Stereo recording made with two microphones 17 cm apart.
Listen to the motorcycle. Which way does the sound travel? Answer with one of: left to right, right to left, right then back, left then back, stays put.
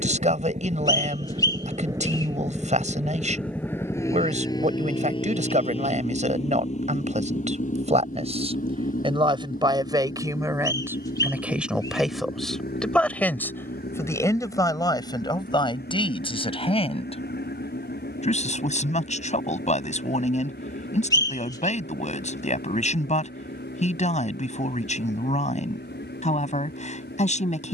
right to left.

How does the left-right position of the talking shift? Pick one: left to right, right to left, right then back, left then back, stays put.
right to left.